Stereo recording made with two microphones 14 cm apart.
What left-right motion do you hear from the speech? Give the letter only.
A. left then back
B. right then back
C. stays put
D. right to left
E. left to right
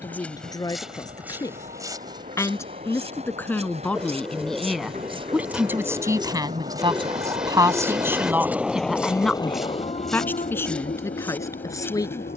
B.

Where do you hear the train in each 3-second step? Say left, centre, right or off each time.
right, right, right, left.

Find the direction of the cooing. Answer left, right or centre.
centre.